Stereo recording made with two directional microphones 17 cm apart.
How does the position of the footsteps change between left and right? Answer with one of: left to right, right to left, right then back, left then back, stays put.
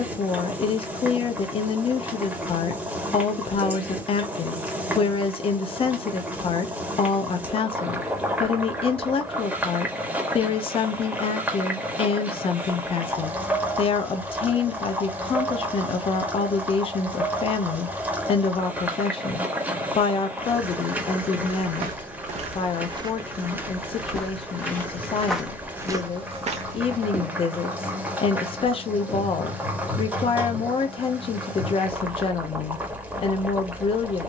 left then back.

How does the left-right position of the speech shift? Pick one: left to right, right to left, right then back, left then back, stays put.
stays put.